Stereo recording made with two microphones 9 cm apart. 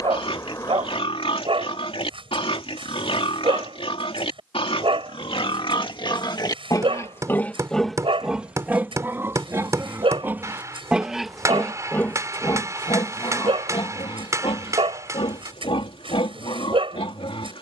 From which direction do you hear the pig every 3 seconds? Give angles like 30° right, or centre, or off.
80° left, 70° left, 20° left, 20° right, 50° left, 80° left.